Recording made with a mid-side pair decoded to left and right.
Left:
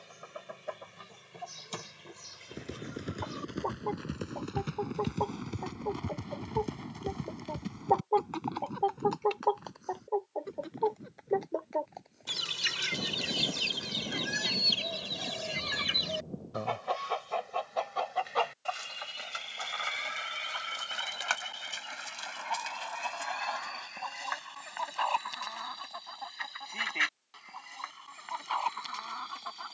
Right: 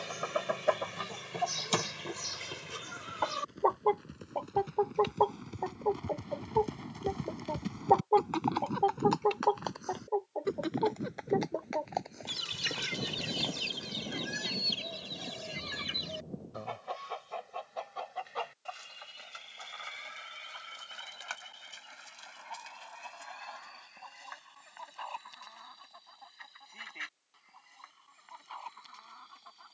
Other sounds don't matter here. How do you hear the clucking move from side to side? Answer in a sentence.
In this clip you hear the clucking move to the left.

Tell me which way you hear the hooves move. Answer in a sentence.
You can hear the hooves go from the left side to the right.